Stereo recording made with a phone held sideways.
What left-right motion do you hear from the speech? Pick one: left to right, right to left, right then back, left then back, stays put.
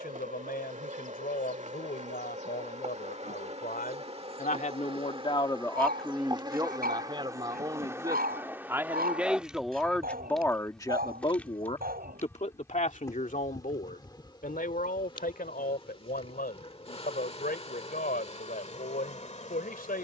right then back.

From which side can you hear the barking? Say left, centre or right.
right.